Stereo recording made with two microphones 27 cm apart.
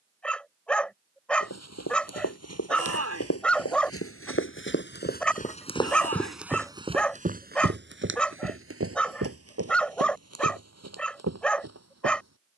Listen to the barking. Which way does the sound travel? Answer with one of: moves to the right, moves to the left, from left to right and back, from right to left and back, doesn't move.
doesn't move.